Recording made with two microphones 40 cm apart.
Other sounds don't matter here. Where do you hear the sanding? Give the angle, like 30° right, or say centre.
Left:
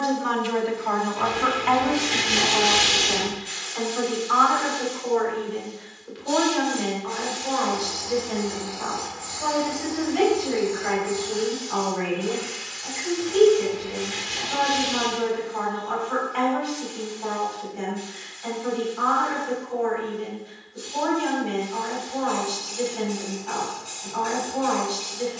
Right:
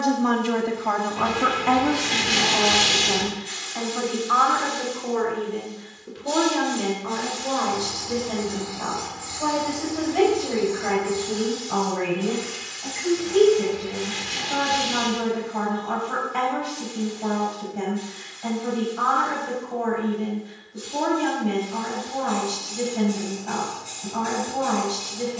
80° right.